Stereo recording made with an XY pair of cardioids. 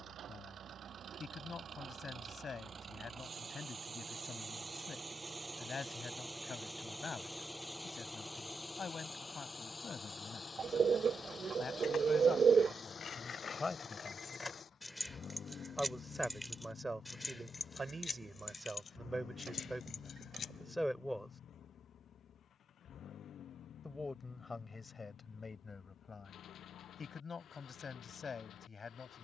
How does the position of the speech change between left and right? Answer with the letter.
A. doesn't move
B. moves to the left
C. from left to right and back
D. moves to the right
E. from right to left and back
C.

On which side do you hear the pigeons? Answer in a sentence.
In this clip you hear the pigeons on the right.